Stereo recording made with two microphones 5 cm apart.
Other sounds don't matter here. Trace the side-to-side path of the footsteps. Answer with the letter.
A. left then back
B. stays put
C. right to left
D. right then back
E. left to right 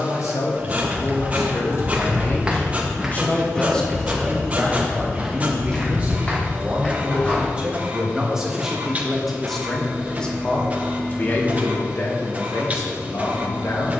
C.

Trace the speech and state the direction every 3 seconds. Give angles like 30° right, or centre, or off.
60° left, centre, 20° right, 20° left, 50° left.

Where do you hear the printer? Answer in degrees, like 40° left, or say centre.
30° right.